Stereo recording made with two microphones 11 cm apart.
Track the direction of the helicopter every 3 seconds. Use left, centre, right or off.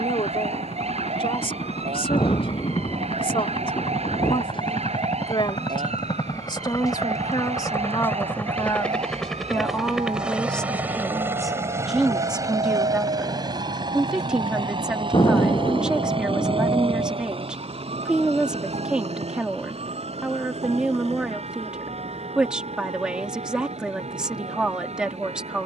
left, left, left, centre, right, right, right, right, right.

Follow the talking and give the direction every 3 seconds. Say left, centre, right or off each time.
left, left, left, centre, centre, centre, centre, centre, centre.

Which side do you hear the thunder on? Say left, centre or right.
left.